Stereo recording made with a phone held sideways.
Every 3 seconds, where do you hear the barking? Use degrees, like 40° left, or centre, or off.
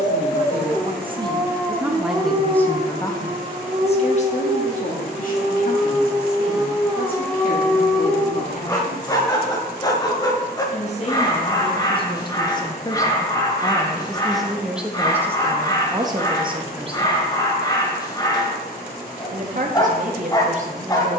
centre, 30° right, 10° left, 20° left, 20° left, 20° left, 20° left.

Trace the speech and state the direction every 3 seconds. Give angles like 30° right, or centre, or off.
20° right, 50° left, 60° left, 40° left, 10° left, 20° right, 50° right.